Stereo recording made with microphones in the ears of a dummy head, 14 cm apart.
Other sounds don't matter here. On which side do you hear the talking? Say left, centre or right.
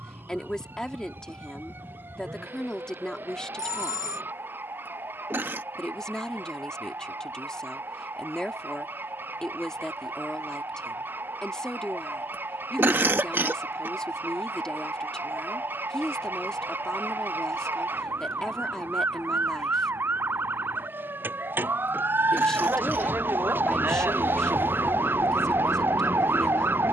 centre.